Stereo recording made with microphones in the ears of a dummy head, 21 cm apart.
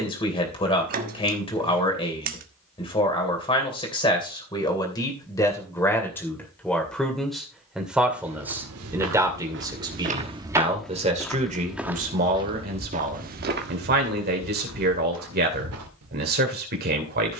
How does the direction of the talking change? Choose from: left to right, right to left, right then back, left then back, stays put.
left to right.